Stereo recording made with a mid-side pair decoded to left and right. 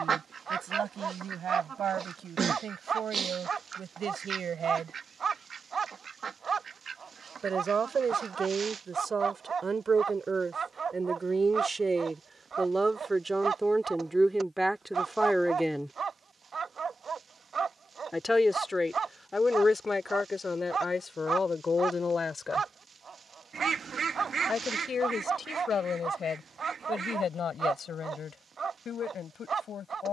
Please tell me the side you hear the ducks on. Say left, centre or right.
right.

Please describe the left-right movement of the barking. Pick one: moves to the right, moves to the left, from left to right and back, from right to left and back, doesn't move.
doesn't move.